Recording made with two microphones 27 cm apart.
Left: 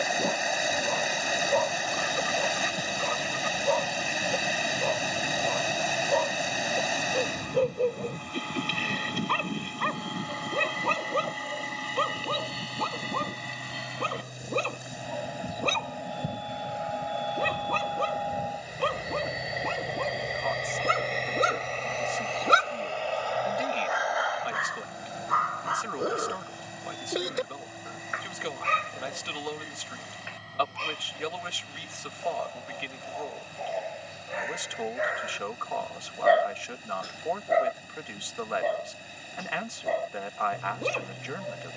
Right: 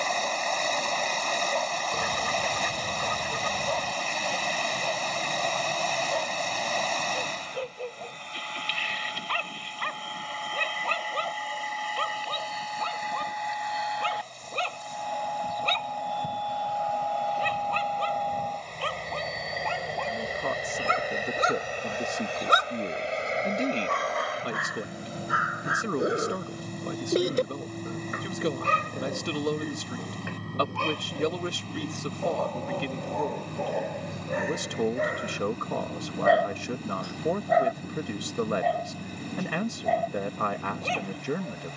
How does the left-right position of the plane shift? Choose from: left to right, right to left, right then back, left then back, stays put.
left to right.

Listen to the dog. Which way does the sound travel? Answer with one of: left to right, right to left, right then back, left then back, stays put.
right then back.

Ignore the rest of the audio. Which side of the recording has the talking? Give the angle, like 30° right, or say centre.
50° right.